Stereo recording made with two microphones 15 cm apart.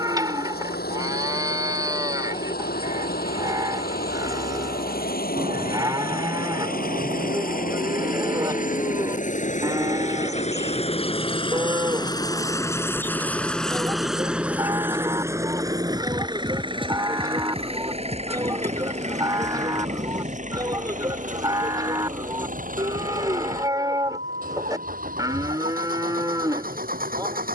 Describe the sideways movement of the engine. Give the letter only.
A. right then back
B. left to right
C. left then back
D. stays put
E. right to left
B.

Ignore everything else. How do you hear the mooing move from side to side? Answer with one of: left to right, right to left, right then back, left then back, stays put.
stays put.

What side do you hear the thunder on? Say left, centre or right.
right.